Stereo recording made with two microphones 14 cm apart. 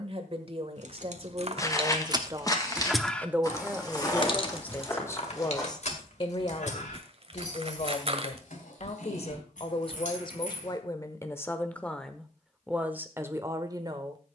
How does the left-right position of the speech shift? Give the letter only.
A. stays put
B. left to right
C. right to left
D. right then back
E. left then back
E.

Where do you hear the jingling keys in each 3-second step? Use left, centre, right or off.
right, left, left, left, off.